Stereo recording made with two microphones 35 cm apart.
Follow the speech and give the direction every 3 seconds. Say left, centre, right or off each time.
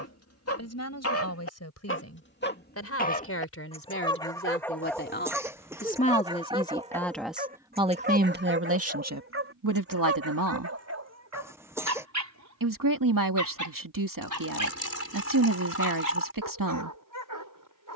left, left, centre, right, right, right.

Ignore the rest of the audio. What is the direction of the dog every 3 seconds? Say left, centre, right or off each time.
left, centre, right, right, right, right.